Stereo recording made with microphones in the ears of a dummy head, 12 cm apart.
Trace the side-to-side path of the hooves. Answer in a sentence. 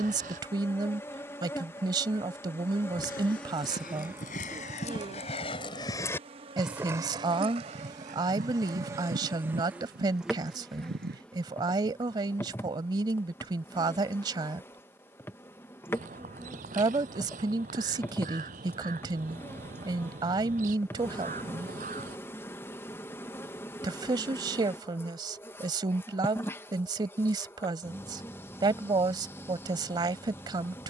In this clip you hear the hooves go from the left side to the right.